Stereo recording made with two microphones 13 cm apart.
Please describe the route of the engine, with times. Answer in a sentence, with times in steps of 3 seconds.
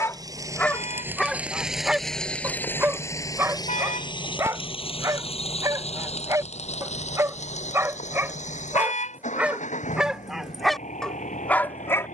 You can hear the engine in the centre from 0 s and on the left from 3 s.